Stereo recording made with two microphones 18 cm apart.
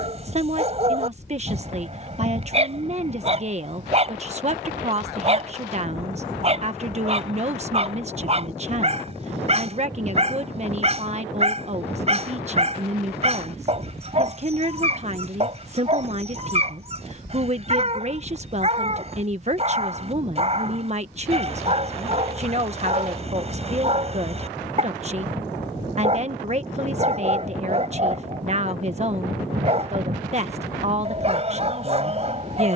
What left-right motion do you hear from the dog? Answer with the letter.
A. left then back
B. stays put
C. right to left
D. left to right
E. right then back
B.